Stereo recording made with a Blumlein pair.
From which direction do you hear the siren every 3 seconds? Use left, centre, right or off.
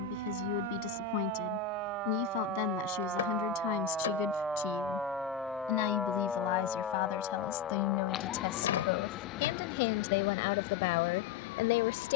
right, centre, left, left.